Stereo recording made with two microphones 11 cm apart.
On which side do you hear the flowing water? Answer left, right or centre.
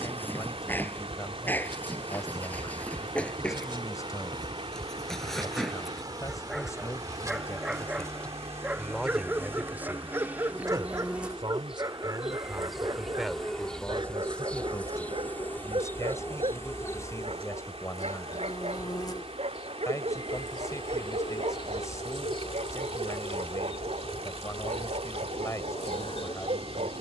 right.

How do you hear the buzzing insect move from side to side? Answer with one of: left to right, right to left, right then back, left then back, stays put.
right to left.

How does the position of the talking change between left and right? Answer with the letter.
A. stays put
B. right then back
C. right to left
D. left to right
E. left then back
B.